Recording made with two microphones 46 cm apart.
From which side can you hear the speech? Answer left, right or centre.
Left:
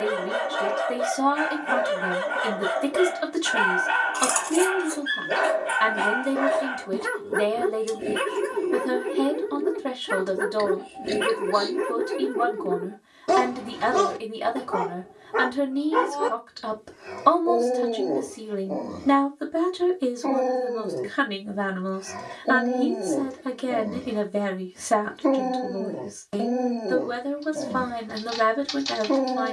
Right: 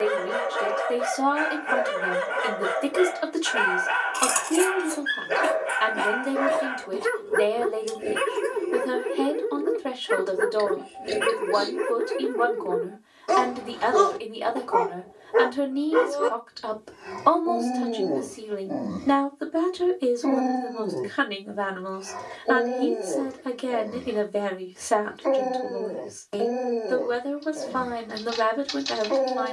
left.